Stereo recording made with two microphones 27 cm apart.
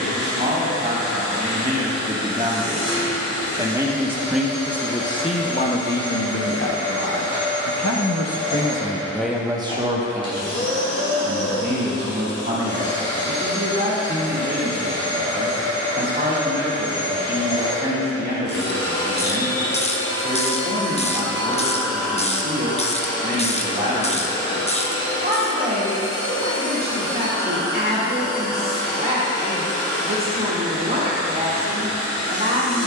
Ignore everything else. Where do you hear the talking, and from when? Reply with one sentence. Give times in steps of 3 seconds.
In this clip you hear the talking on the right from 0 s, in the centre from 3 s, on the left from 6 s and on the right from 9 s.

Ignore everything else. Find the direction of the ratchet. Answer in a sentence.
You can hear the ratchet on the left.